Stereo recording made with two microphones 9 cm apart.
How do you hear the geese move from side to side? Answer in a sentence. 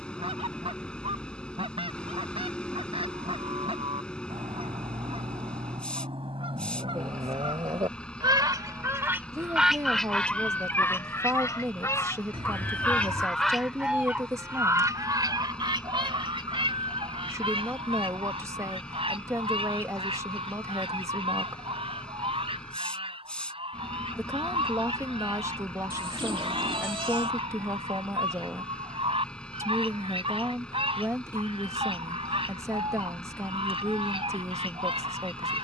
You can hear the geese go left and come back.